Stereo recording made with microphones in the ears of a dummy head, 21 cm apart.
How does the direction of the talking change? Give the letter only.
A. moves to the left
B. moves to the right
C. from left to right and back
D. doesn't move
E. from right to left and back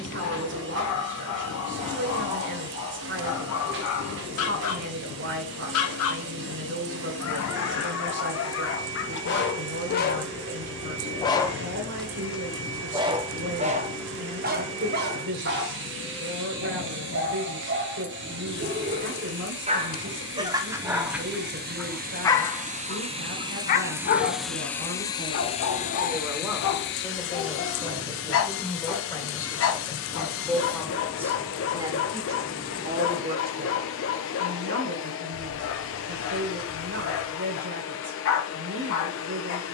E.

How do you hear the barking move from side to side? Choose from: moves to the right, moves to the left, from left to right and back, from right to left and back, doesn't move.
from left to right and back.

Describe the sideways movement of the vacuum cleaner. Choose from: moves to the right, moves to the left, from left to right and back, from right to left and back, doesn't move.
moves to the left.